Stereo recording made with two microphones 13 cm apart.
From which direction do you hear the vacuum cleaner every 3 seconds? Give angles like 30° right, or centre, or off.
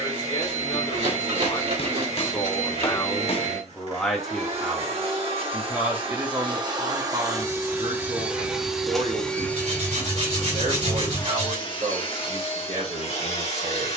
50° right, 50° right, 20° right, 20° left, 50° left.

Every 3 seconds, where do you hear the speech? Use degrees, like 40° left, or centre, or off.
30° left, centre, 30° right, 60° right, 60° right.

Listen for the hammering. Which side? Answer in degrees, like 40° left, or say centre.
50° left.